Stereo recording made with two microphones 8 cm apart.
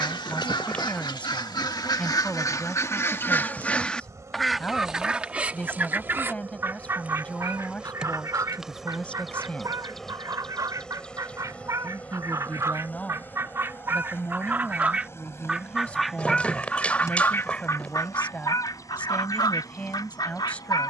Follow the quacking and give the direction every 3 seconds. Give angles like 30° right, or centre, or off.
60° left, centre, 40° right, 50° right, 30° right, 10° left, 50° left.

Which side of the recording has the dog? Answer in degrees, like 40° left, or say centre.
20° left.